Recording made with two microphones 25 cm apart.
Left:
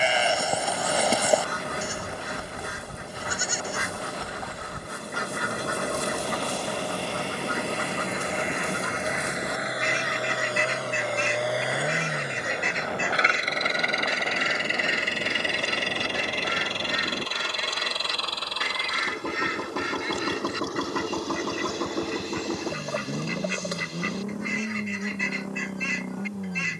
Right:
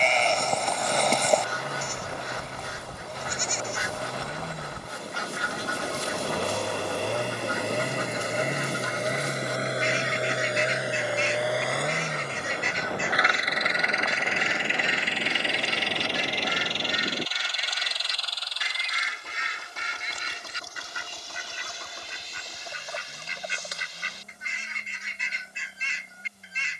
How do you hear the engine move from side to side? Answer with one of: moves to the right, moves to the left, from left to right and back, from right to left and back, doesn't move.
moves to the left.